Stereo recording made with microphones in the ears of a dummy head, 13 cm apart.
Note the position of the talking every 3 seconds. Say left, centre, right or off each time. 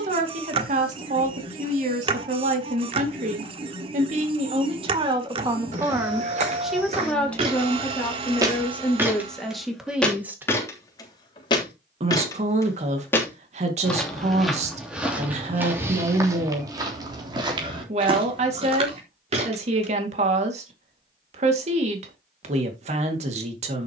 right, right, centre, centre, right, right, right, right.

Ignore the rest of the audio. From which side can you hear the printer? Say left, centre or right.
right.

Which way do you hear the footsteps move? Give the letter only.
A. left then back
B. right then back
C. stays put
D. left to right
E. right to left
A.